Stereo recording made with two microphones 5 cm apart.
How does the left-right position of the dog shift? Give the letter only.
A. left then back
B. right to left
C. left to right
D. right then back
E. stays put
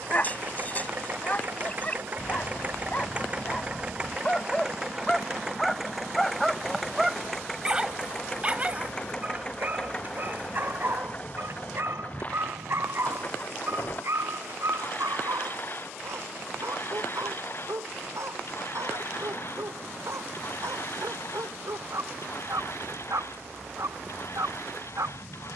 C.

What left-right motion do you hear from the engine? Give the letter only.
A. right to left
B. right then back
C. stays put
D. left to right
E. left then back
A.